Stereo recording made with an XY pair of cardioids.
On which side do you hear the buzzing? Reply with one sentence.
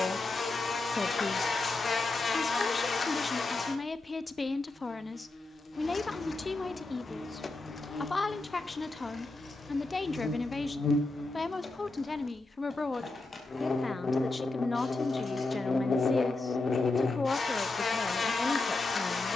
In this clip you hear the buzzing on the left.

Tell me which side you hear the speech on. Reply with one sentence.
In this clip you hear the speech on the left.